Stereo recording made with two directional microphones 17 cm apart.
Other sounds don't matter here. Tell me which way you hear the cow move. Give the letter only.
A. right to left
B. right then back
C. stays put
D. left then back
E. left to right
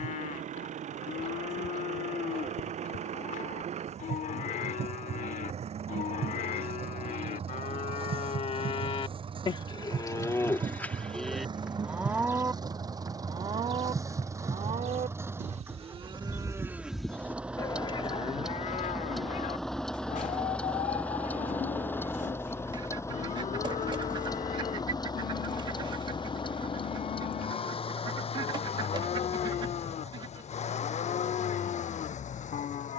B.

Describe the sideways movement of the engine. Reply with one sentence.
In this clip you hear the engine go from the right side to the left.